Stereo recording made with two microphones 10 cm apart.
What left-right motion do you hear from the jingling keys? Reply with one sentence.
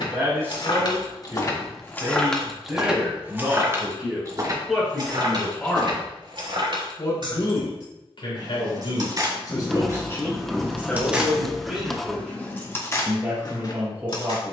In this clip you hear the jingling keys move from left to right and back again.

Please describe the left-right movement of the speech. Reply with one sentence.
You can hear the speech go left and come back.